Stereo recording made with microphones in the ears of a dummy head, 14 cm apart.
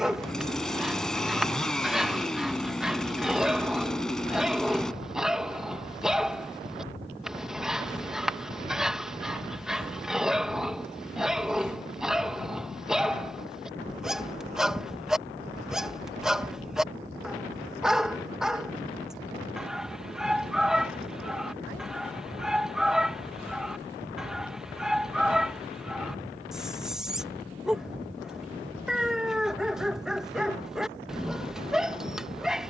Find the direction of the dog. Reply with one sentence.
You can hear the dog in the centre.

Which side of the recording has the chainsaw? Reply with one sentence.
You can hear the chainsaw in the centre.